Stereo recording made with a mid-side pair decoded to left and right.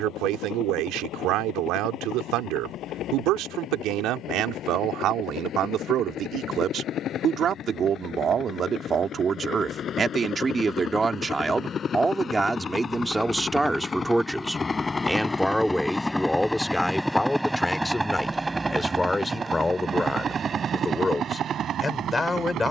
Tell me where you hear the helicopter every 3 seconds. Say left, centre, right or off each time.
left, left, left, left, left, centre, right, right.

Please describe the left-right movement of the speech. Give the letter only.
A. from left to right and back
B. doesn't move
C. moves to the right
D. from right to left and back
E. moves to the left
E.